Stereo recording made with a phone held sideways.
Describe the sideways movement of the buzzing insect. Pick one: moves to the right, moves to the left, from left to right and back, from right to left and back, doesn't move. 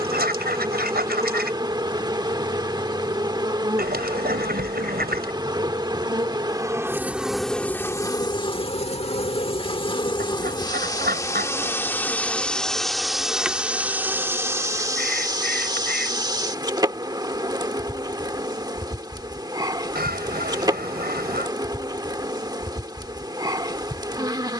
from right to left and back.